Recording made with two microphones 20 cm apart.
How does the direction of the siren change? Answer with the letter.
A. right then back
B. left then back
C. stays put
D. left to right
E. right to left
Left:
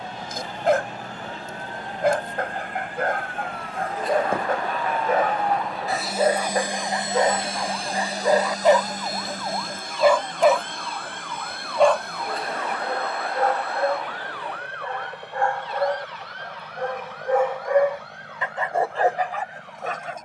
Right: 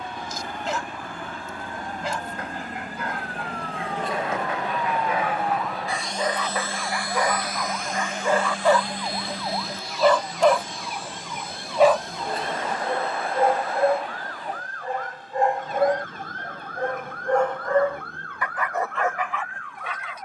D.